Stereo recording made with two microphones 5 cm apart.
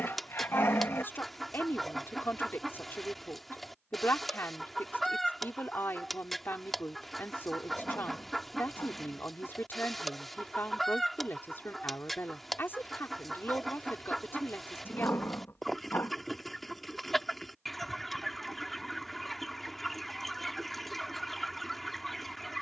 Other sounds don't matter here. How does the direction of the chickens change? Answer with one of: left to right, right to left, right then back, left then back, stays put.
stays put.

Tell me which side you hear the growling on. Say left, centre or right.
left.